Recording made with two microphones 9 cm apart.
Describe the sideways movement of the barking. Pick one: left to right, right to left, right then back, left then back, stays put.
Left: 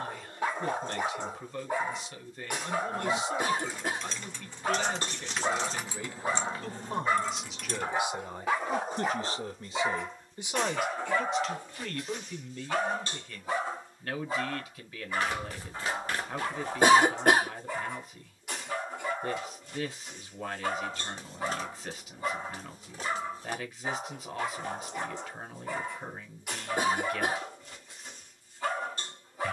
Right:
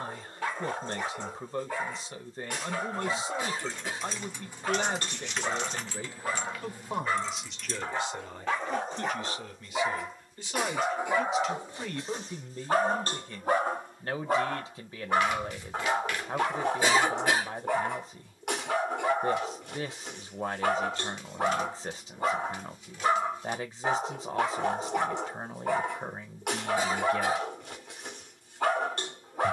left to right.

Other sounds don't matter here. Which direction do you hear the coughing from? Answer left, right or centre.
left.